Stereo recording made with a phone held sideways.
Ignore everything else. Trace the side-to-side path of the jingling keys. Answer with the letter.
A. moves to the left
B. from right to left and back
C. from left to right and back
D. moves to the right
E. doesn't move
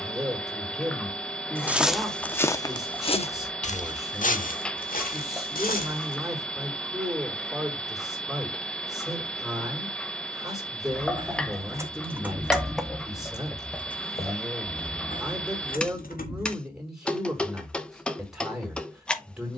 A.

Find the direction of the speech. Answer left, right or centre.
centre.